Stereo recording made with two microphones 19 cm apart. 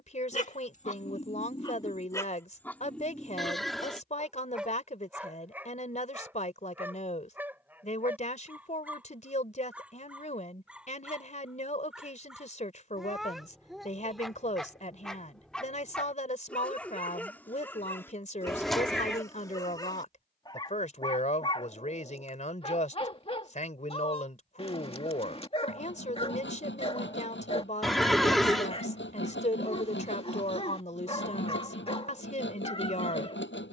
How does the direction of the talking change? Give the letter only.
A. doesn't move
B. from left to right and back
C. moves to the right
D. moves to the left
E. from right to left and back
A.